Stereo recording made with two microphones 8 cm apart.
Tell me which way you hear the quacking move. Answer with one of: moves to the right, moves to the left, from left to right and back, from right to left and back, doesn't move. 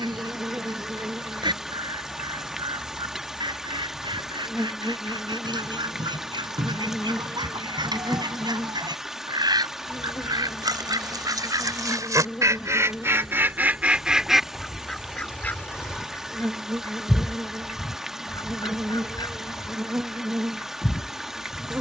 moves to the left.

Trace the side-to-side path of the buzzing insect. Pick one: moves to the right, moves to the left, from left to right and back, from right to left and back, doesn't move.
from right to left and back.